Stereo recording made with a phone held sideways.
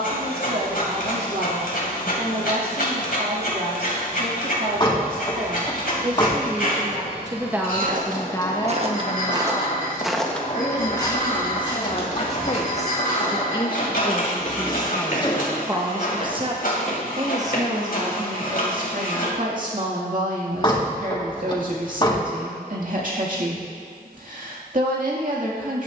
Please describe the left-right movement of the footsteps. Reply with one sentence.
You can hear the footsteps move to the left.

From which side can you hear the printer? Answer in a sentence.
You can hear the printer on the left.